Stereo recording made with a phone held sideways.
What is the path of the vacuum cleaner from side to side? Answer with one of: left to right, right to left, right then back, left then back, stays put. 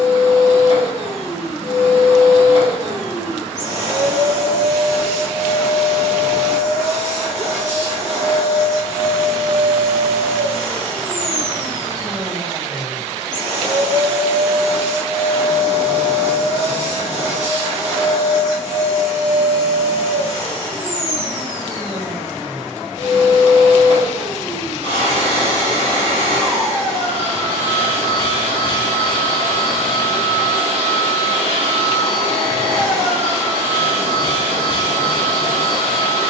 stays put.